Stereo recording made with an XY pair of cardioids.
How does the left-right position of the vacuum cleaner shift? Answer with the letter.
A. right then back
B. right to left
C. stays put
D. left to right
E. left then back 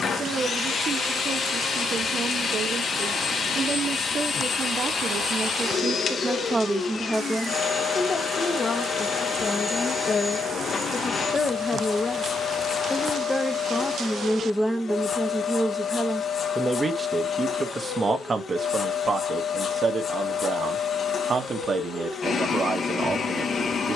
C.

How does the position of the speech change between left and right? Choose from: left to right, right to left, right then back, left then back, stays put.
left then back.